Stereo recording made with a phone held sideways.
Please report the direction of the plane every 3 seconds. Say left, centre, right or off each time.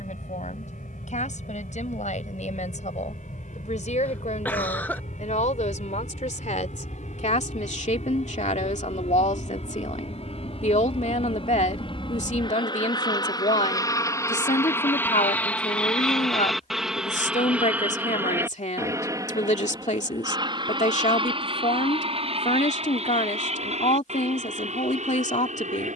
left, left, left, left, left, centre, right, right, right.